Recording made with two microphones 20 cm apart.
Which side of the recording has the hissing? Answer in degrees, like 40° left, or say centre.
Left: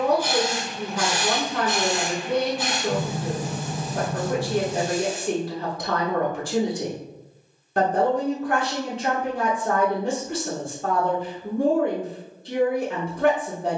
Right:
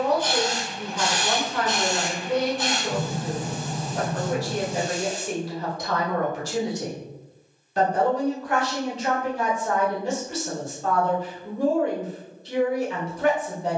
10° left.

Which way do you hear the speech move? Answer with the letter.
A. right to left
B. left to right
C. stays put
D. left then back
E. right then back
C.